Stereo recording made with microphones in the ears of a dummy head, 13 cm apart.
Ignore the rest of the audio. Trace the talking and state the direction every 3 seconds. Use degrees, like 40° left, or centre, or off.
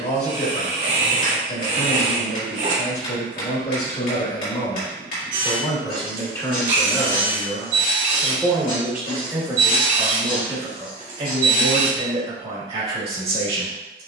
50° left, 40° left, centre, 30° right, 40° right.